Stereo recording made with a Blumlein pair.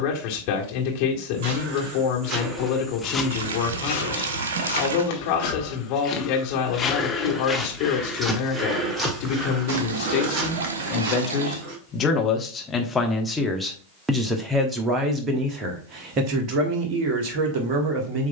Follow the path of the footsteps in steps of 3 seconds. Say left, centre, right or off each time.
right, left, centre, right, off, off.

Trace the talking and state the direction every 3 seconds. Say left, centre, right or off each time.
left, left, left, left, centre, right.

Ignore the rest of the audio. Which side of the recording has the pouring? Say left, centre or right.
right.